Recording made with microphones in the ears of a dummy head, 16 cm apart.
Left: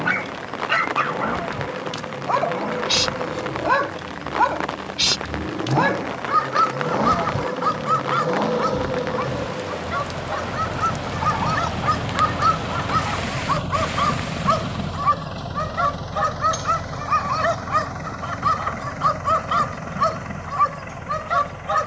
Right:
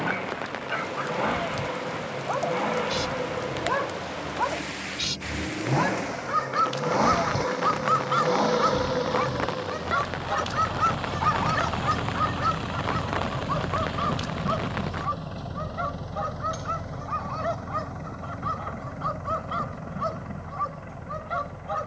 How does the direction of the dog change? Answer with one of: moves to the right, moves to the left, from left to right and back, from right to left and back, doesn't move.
from left to right and back.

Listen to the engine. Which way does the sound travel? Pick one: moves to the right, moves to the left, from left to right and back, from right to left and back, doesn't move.
moves to the left.